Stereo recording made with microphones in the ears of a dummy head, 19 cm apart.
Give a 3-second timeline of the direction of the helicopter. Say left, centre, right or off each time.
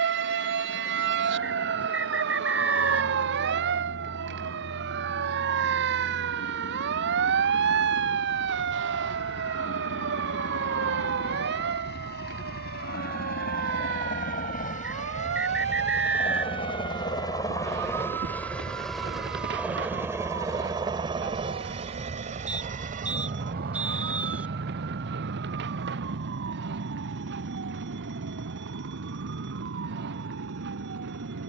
left, left, left, left, left, left, centre, right, right, right, right.